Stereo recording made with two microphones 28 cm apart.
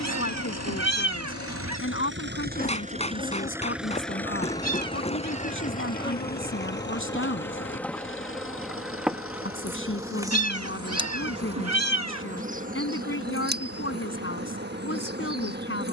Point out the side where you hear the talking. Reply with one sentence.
You can hear the talking on the left.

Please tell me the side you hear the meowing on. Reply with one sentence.
You can hear the meowing on the right.